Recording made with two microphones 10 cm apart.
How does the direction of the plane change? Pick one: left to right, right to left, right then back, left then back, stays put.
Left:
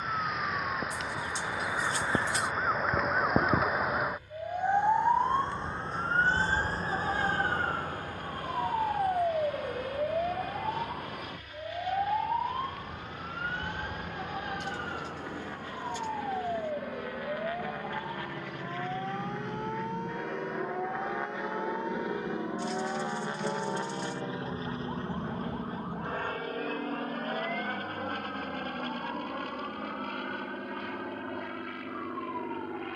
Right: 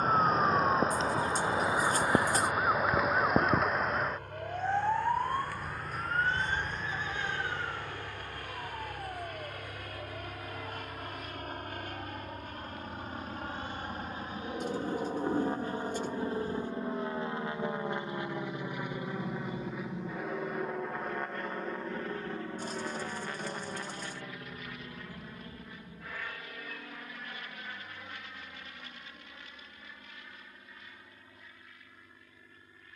right to left.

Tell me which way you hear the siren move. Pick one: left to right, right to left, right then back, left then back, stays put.
right to left.